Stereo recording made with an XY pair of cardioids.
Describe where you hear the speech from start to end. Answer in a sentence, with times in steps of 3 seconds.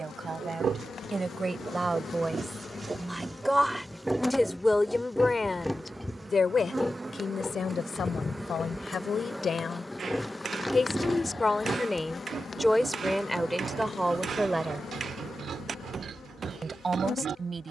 In this clip you hear the speech on the right from 0 s, in the centre from 3 s, on the left from 6 s, in the centre from 12 s and on the right from 15 s.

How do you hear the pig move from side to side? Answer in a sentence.
In this clip you hear the pig go left and come back.